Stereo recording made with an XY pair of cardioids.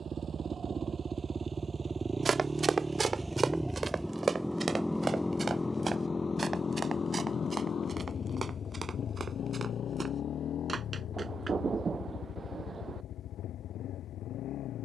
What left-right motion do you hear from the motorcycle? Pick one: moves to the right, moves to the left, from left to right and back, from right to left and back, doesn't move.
moves to the left.